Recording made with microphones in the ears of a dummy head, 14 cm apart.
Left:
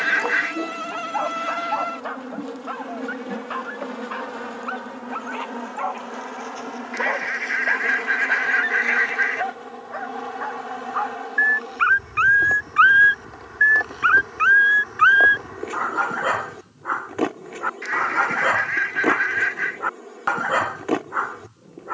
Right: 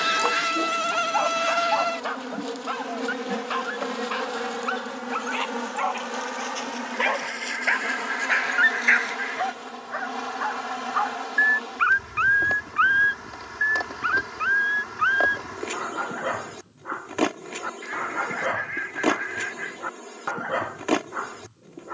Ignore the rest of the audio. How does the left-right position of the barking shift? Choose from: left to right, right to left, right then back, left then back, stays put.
right to left.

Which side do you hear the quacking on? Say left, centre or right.
left.